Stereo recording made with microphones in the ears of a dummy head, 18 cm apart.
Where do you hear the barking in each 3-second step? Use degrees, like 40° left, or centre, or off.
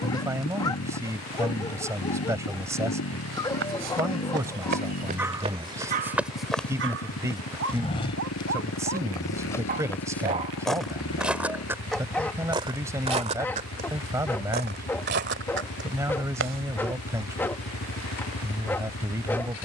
20° left, 10° left, 60° right, 30° right, 10° left, 10° left, 10° left.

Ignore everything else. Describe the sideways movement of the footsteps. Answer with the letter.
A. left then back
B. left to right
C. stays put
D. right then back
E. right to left
A.